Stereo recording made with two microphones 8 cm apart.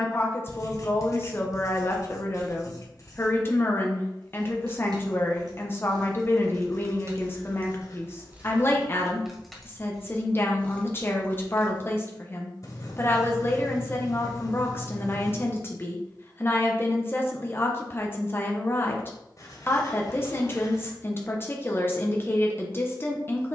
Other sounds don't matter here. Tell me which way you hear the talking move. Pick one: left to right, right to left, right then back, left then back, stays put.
stays put.